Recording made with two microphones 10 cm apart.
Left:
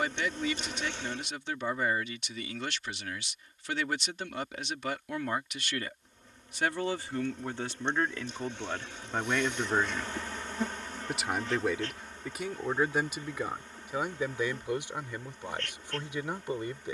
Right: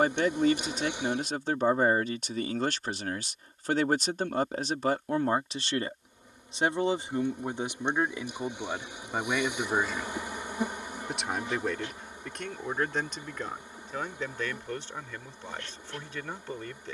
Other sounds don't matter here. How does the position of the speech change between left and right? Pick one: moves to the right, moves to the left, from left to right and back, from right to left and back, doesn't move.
moves to the left.